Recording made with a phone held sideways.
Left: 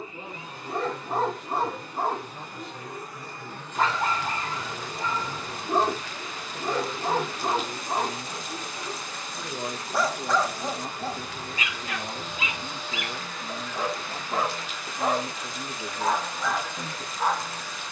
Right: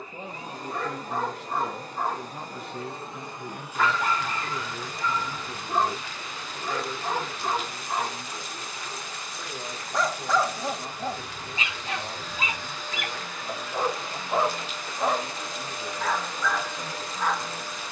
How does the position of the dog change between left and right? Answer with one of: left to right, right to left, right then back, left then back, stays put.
right then back.